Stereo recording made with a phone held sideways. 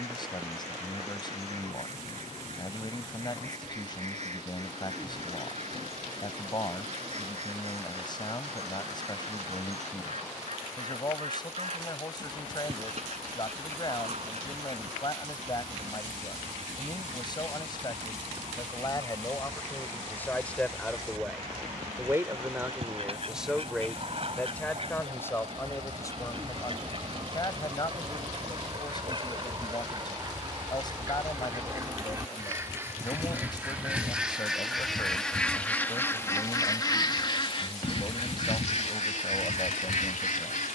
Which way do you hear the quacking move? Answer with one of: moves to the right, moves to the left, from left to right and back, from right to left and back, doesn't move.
moves to the left.